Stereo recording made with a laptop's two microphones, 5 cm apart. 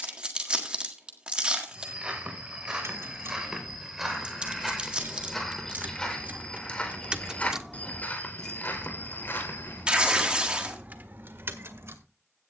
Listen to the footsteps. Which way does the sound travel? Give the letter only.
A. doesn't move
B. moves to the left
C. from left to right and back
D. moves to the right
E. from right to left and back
B.